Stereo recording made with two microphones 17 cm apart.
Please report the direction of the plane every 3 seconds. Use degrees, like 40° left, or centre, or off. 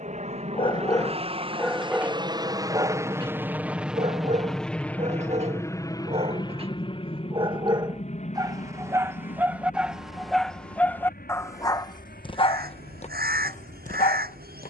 30° right, centre, 30° left, 50° left, 60° left.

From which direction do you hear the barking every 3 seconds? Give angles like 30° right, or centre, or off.
centre, 40° right, 30° right, centre, 40° left.